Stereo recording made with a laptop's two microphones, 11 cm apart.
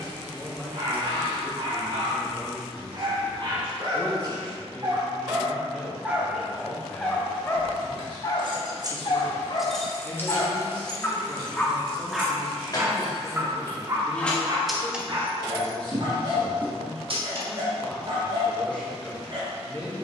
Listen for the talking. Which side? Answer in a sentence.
You can hear the talking in the centre.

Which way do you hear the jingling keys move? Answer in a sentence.
You can hear the jingling keys go left and come back.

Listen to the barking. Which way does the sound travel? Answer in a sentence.
You can hear the barking move from right to left and back again.